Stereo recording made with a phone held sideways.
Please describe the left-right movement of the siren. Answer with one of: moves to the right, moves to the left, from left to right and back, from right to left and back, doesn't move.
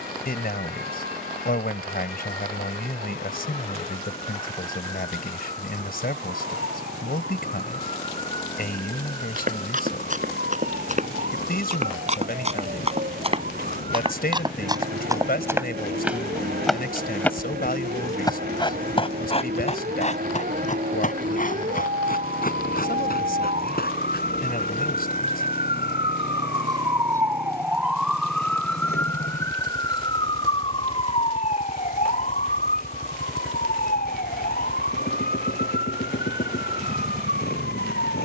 moves to the left.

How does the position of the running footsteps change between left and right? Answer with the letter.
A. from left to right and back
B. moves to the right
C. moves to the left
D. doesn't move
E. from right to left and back
C.